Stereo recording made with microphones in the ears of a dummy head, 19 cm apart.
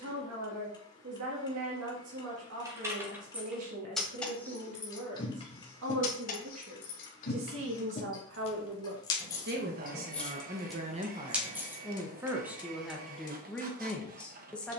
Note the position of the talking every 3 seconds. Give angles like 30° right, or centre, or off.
80° right, 80° right, 70° right, 40° right, centre.